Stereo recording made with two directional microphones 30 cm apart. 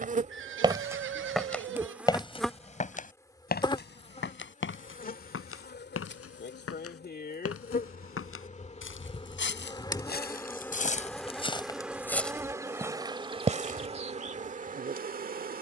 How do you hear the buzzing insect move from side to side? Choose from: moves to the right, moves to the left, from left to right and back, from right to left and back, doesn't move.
from right to left and back.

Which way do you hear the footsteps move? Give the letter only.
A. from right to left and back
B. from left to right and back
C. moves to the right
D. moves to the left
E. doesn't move
A.